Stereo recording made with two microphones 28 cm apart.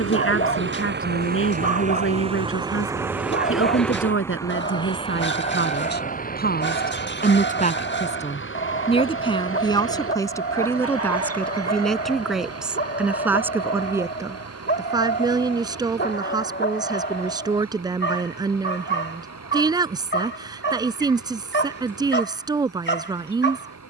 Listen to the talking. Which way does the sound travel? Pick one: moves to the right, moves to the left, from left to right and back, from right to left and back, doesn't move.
moves to the right.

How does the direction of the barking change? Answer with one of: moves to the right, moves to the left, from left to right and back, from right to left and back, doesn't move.
doesn't move.